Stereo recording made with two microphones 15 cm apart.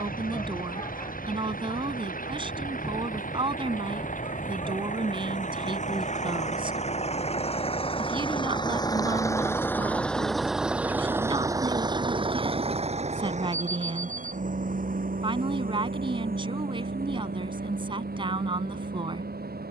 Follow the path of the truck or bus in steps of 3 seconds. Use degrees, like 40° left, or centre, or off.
70° left, 60° left, 40° left, centre, 50° right, 70° right, 80° right.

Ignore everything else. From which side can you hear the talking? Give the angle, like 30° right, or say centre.
30° right.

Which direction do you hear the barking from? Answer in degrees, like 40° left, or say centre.
30° left.